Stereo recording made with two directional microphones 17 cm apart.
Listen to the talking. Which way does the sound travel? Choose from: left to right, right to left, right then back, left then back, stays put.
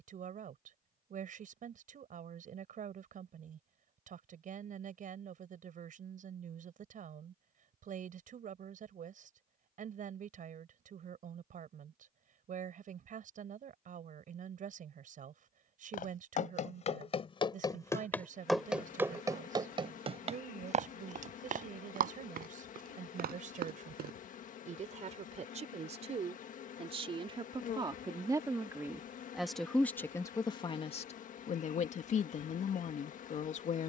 right to left.